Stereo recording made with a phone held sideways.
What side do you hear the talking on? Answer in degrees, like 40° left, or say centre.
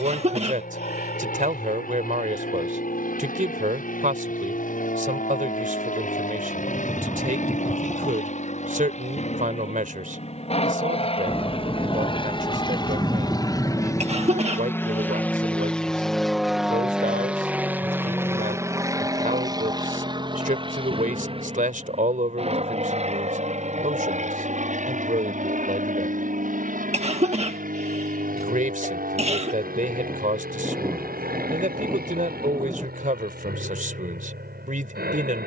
60° right.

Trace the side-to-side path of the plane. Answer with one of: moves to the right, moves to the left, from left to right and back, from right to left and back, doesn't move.
moves to the right.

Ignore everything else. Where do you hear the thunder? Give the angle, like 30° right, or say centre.
10° right.